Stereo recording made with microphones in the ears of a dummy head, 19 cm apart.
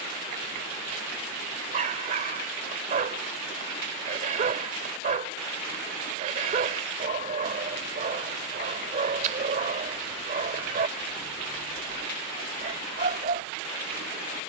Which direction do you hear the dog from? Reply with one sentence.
In this clip you hear the dog on the right.